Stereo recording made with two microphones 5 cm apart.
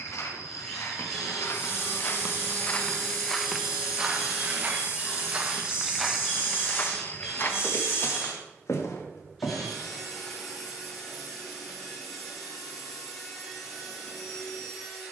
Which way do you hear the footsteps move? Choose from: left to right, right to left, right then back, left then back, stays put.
right then back.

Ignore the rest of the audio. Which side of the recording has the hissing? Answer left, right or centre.
left.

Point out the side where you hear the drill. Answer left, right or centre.
centre.